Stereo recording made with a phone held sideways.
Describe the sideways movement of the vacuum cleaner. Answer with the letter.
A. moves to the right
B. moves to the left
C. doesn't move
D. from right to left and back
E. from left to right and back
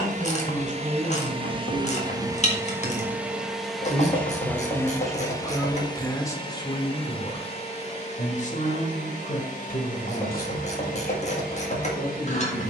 B.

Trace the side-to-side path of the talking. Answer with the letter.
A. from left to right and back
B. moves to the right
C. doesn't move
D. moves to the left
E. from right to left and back
D.